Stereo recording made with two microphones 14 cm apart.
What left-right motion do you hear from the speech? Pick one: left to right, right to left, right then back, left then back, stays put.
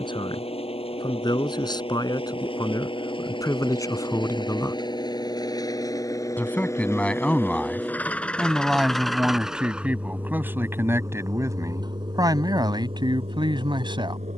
left to right.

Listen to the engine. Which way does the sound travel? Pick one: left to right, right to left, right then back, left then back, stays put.
left to right.